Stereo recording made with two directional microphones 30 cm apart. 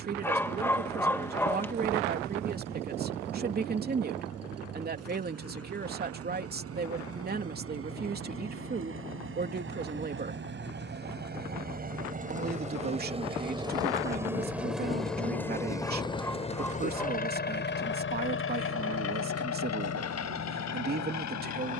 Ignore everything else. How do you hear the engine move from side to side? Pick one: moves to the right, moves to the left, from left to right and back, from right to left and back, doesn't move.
moves to the left.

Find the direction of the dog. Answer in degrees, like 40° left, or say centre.
10° left.